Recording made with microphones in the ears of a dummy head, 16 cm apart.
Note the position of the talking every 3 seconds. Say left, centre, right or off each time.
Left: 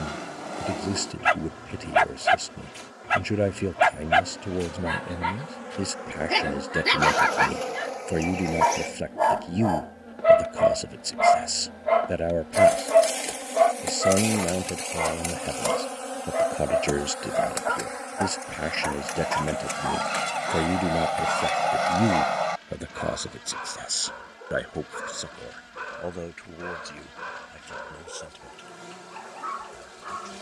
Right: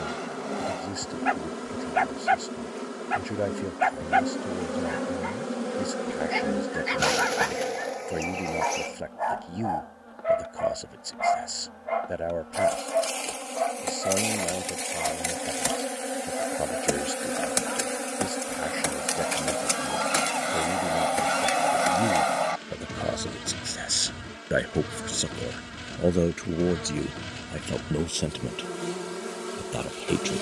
left, left, left, left, left, left, left, centre, right, right.